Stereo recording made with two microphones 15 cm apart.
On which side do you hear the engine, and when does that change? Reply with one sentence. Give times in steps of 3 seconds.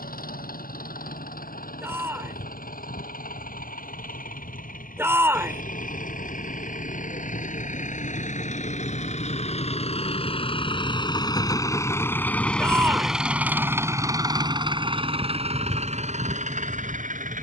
You can hear the engine on the left from 0 s, in the centre from 12 s and on the right from 15 s.